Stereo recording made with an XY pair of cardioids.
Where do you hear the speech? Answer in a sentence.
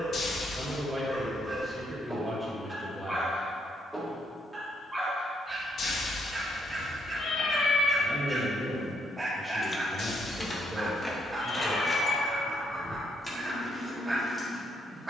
You can hear the speech in the centre.